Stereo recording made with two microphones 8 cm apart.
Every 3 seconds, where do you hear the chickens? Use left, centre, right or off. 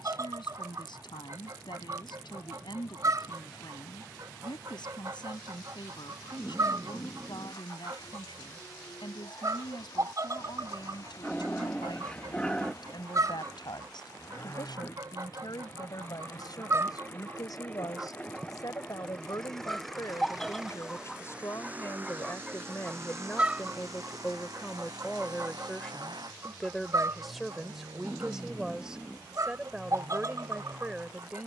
right, right, right, right, right, right, centre, centre, right, right, right.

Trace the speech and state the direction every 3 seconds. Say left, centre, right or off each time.
left, left, left, left, left, left, left, left, centre, centre, centre.